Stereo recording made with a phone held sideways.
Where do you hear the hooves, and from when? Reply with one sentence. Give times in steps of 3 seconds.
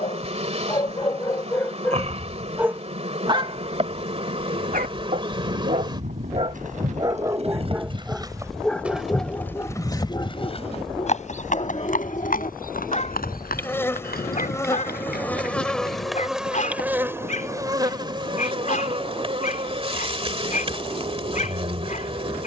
You can hear the hooves not at all from 0 s, on the right from 3 s, on the left from 9 s and not at all from 18 s.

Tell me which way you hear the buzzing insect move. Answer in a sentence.
You can hear the buzzing insect move from right to left and back again.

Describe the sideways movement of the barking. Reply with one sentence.
In this clip you hear the barking go right and come back.